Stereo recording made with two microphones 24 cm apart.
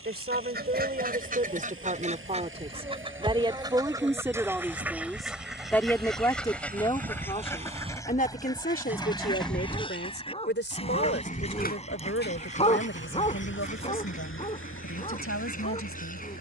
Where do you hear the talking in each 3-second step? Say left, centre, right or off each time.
right, centre, left, left, left, left.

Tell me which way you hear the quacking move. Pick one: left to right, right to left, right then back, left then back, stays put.
right to left.